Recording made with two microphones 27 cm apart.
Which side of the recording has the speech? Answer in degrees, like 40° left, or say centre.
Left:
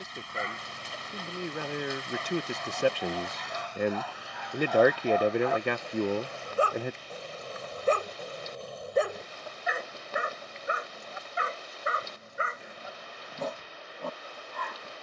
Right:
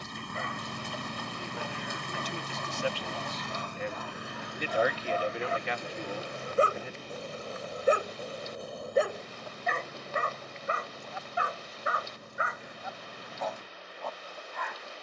60° left.